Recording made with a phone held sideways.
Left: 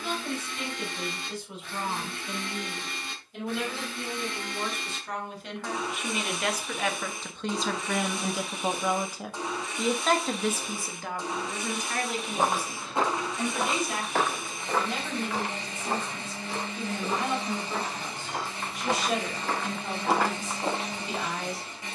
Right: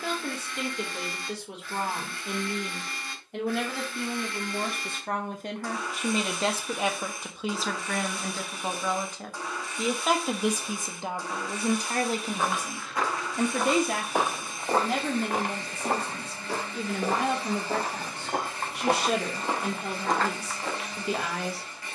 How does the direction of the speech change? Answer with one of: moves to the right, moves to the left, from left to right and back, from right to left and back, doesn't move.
from right to left and back.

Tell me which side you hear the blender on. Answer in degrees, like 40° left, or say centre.
20° left.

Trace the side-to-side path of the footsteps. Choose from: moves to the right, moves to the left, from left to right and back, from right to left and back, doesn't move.
from left to right and back.